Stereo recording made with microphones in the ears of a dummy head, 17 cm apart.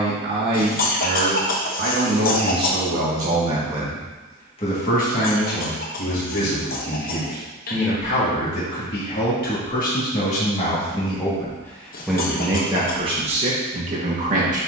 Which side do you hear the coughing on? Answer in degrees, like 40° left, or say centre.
40° left.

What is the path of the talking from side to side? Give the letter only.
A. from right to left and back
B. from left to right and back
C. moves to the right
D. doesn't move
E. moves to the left
A.